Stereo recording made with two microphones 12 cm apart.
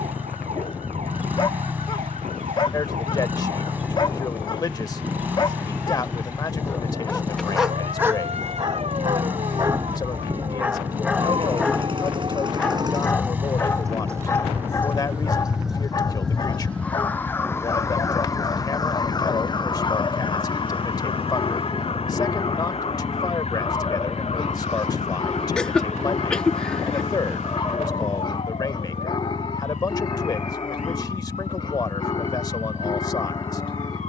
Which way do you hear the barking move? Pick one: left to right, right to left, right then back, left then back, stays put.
right then back.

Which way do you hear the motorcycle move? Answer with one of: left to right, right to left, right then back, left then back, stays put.
stays put.